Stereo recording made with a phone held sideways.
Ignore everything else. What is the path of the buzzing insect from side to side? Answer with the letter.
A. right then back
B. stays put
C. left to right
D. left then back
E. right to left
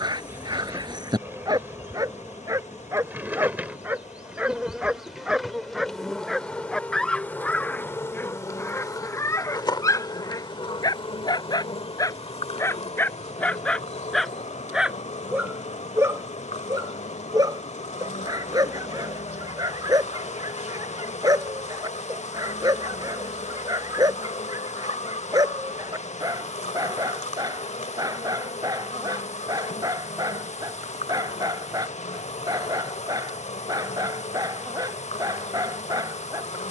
E.